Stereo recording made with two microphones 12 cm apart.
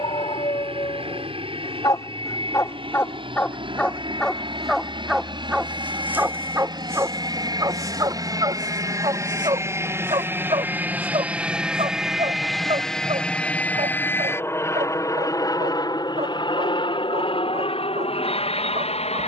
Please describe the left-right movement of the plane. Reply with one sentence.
In this clip you hear the plane move to the left.